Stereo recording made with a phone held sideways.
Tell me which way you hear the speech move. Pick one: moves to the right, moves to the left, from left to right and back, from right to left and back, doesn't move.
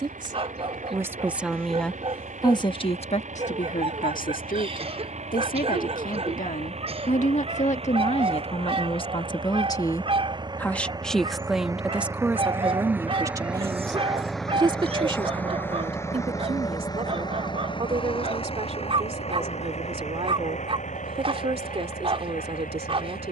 from right to left and back.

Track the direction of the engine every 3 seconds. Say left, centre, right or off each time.
right, right, right, right, centre, left, left, left.